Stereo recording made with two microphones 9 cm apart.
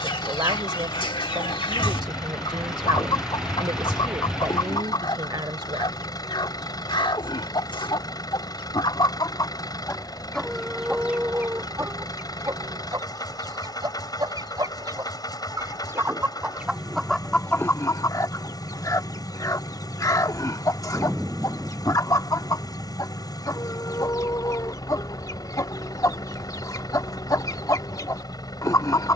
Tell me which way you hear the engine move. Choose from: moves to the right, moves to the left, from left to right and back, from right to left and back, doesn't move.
doesn't move.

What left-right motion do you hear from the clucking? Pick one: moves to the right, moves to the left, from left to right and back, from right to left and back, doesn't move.
from left to right and back.